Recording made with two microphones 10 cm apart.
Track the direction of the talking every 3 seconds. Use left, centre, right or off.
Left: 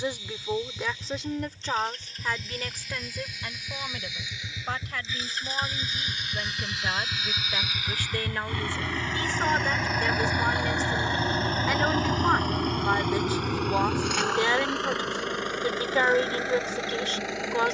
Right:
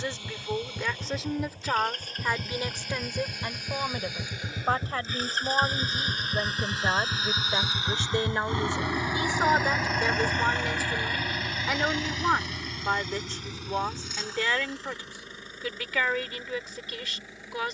centre, right, right, centre, centre, left.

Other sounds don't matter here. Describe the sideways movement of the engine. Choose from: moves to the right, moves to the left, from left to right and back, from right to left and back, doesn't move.
moves to the left.